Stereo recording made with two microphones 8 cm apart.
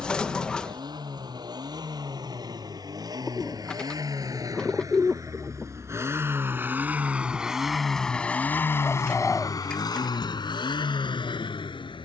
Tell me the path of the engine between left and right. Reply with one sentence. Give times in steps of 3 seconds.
In this clip you hear the engine on the right from 0 s, in the centre from 6 s and on the left from 9 s.